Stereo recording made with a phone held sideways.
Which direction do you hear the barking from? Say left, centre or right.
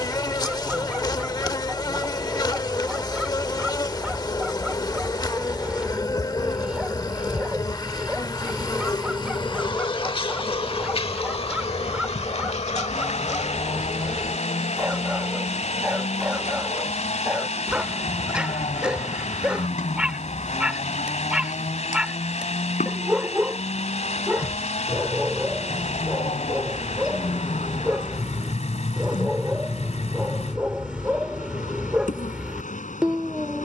centre.